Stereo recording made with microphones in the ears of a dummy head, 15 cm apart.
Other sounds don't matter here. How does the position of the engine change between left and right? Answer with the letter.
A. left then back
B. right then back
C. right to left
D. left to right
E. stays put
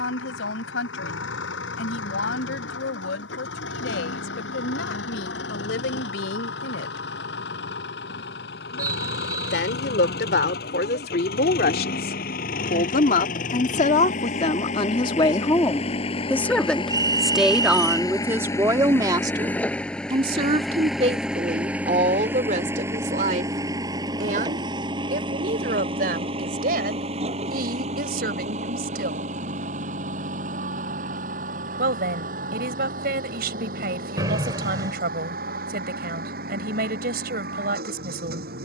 D.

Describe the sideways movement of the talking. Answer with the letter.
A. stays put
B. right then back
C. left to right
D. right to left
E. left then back
C.